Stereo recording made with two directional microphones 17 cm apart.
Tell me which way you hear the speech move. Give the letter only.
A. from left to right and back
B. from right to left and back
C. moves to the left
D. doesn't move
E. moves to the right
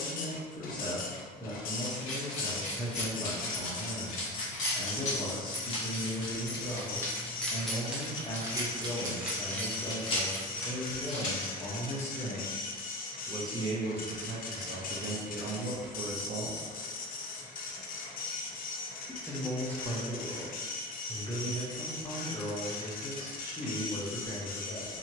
A.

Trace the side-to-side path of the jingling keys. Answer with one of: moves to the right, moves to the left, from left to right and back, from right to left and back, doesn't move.
from left to right and back.